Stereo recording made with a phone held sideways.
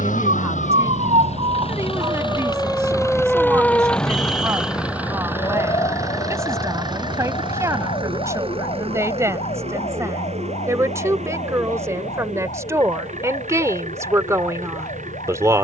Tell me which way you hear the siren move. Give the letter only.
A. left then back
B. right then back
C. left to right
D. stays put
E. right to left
E.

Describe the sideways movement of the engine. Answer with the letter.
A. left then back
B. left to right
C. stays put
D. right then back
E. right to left
B.